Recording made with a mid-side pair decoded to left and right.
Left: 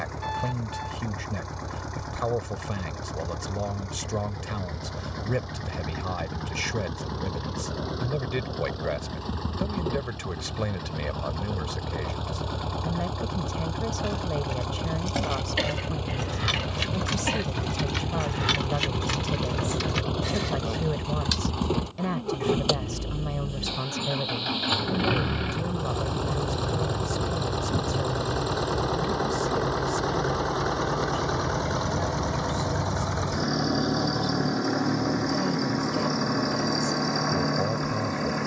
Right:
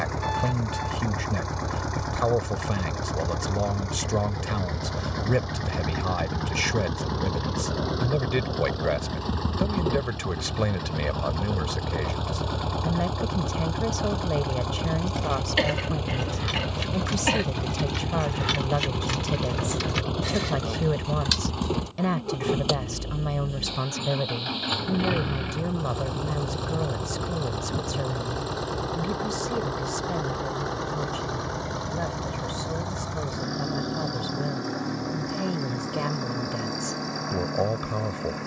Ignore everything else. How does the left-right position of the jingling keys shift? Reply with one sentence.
In this clip you hear the jingling keys move from left to right.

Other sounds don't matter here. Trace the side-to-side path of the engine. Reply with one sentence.
You can hear the engine move to the left.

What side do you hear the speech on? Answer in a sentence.
You can hear the speech on the right.